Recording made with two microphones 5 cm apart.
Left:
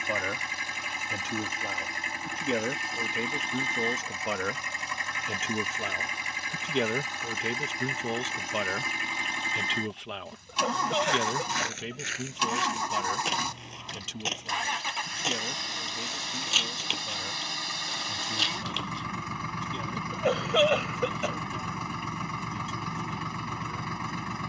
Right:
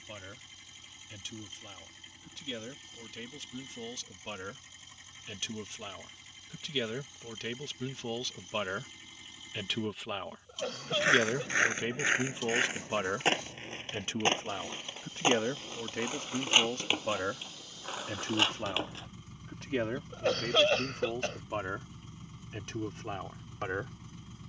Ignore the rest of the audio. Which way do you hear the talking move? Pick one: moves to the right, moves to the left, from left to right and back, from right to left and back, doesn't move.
moves to the right.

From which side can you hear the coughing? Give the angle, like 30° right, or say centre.
10° left.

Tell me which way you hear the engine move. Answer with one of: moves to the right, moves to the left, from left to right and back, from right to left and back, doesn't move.
doesn't move.